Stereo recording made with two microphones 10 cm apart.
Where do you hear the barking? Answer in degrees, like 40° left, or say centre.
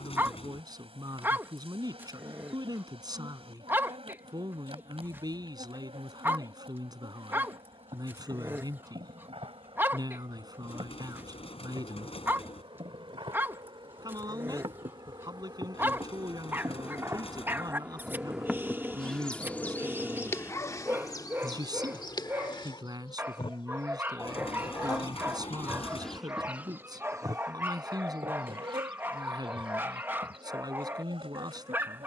20° right.